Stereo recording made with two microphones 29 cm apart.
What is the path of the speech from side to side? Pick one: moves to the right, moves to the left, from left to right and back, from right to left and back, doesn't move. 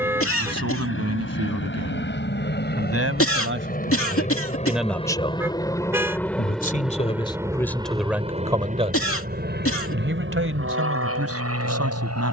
from right to left and back.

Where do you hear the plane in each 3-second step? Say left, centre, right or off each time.
left, left, centre, right.